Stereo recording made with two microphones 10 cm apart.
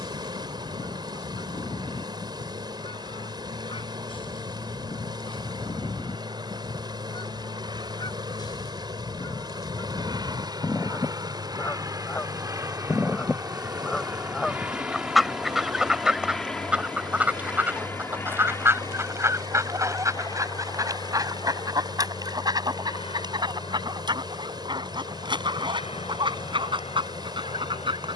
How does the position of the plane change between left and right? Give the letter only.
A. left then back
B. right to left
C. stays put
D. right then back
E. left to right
B.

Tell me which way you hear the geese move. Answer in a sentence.
You can hear the geese go from the left side to the right.